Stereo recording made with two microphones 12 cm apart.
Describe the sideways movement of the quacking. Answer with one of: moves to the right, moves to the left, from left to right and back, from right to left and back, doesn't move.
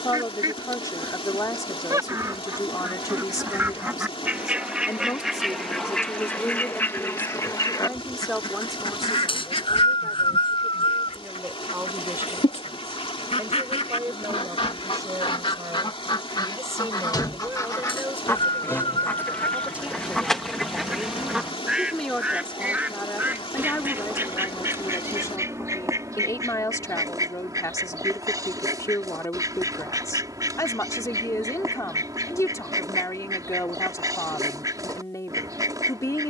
from right to left and back.